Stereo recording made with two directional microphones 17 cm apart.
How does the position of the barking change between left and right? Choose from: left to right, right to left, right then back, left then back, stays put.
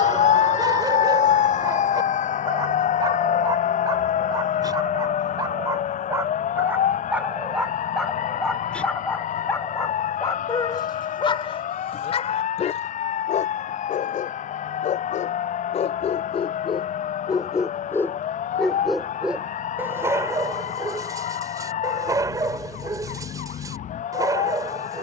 left then back.